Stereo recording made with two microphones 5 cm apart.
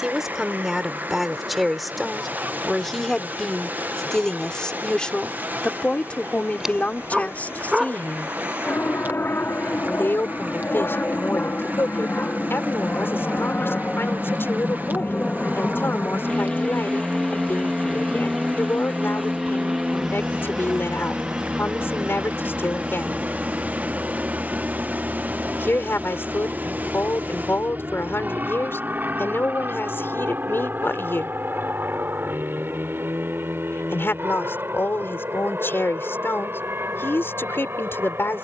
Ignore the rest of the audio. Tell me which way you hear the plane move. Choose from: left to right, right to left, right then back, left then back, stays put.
left to right.